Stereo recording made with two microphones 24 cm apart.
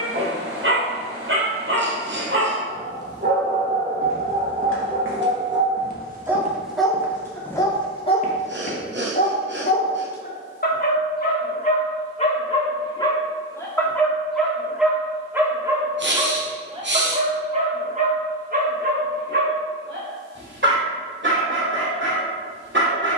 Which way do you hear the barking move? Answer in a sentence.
In this clip you hear the barking move from right to left and back again.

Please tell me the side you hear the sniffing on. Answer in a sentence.
In this clip you hear the sniffing on the right.